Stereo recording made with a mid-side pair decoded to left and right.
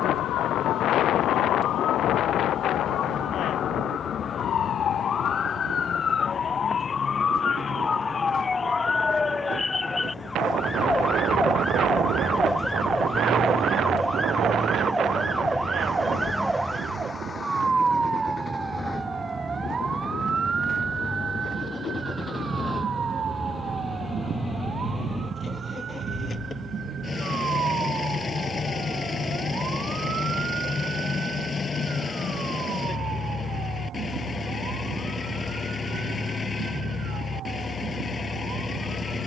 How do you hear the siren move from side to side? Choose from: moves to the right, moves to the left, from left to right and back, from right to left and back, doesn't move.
moves to the right.